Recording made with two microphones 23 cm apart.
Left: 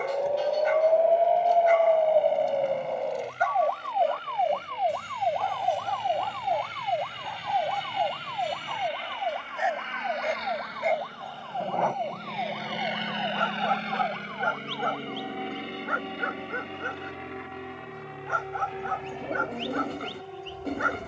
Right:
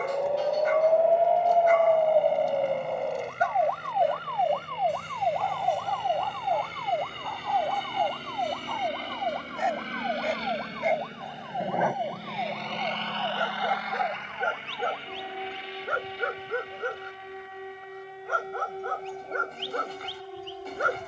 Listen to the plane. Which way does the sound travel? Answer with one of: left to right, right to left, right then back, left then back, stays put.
right to left.